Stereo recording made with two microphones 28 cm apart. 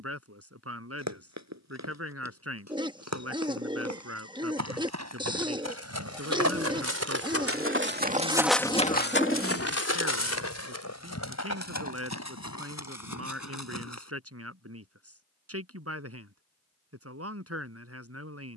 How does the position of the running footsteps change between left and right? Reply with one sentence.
In this clip you hear the running footsteps move to the left.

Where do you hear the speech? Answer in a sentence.
You can hear the speech on the right.